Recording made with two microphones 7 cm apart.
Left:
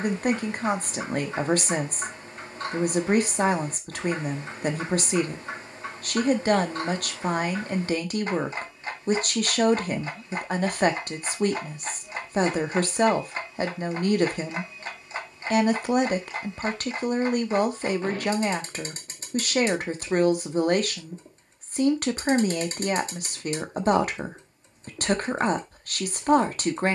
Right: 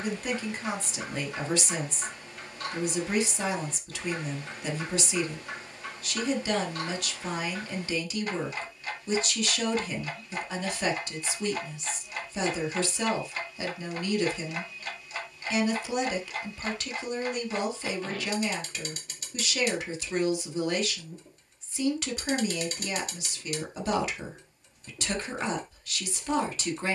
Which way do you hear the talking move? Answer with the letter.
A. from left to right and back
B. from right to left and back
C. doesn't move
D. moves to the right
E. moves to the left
C.